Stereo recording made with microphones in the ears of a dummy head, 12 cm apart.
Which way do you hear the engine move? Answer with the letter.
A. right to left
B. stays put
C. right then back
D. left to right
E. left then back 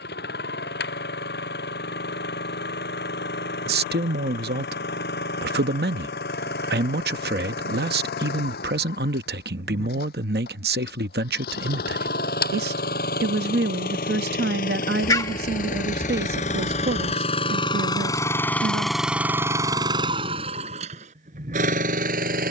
D.